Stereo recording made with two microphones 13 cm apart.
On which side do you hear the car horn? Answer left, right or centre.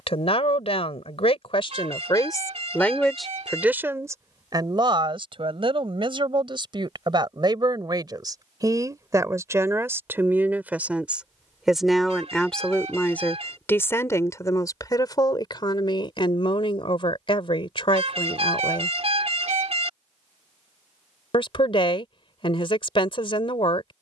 right.